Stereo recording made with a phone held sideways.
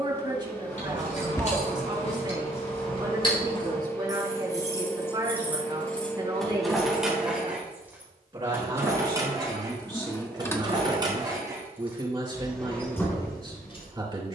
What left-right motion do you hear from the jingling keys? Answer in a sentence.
In this clip you hear the jingling keys move from left to right and back again.